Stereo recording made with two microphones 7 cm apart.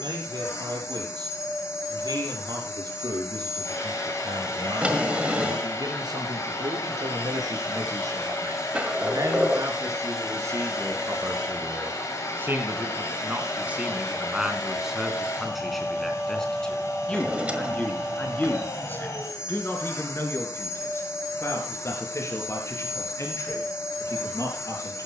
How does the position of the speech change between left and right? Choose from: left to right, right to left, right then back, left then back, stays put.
right to left.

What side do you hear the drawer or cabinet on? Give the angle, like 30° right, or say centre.
20° right.